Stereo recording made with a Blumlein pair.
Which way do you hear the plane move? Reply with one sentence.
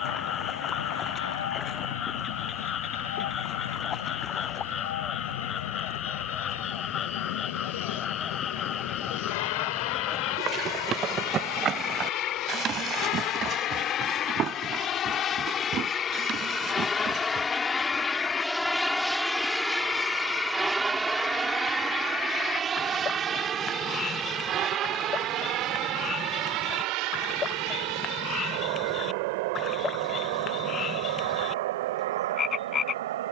You can hear the plane move to the right.